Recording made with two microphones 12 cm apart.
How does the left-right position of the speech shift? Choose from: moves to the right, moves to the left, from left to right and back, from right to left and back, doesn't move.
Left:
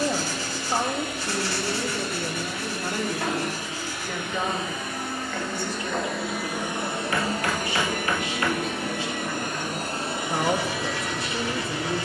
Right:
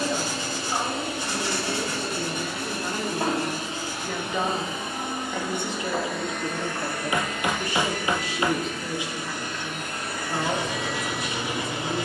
from left to right and back.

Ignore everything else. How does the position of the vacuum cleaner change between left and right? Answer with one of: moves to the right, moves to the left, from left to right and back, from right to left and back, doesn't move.
from right to left and back.